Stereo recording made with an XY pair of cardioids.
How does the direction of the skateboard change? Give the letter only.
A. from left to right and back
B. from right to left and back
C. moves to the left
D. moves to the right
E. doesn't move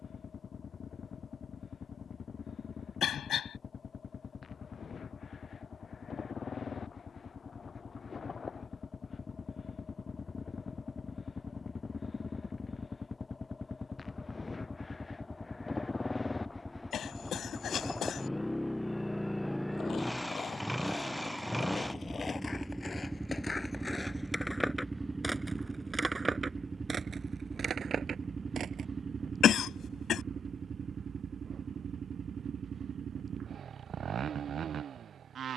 D.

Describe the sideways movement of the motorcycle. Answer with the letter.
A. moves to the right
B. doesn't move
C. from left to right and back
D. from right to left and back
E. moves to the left
A.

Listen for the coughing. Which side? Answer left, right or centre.
left.